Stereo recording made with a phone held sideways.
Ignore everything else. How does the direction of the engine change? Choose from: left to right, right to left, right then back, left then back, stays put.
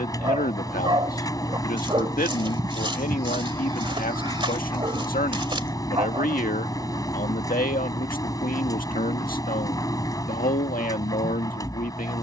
stays put.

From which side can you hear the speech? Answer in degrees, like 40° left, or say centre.
60° left.